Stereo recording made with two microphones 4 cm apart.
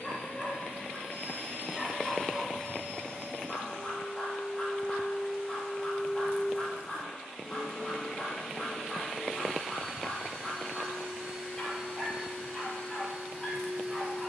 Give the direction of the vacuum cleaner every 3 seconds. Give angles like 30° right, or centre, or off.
30° left, 10° left, centre, 10° right, 10° right.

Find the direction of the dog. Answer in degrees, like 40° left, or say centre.
10° left.